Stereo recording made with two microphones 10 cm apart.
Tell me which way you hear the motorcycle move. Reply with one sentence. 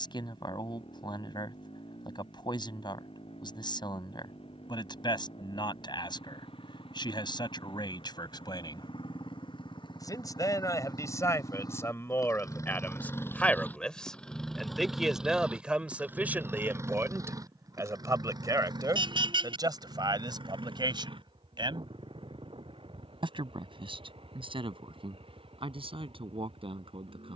You can hear the motorcycle move from left to right.